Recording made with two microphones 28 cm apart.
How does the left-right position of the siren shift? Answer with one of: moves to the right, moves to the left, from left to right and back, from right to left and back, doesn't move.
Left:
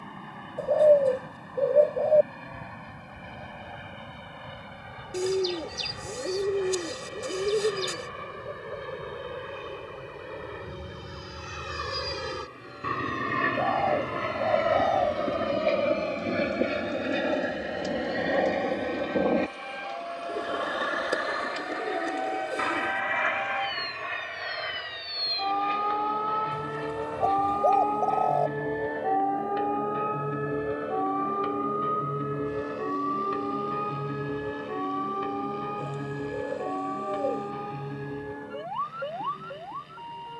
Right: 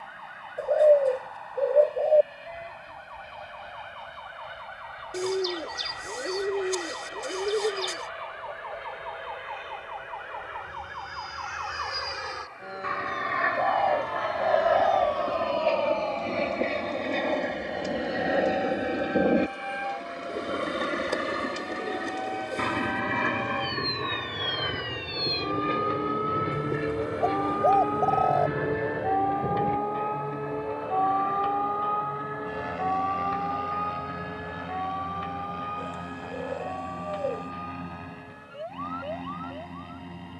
moves to the left.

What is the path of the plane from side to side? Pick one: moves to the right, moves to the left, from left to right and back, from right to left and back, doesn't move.
moves to the right.